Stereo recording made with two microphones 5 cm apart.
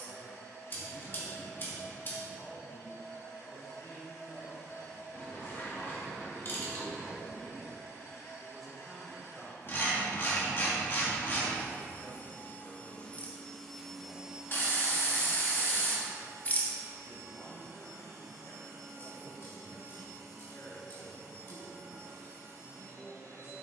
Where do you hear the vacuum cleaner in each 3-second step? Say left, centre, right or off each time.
left, left, left, left, centre, right, right, right.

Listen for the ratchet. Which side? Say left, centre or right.
left.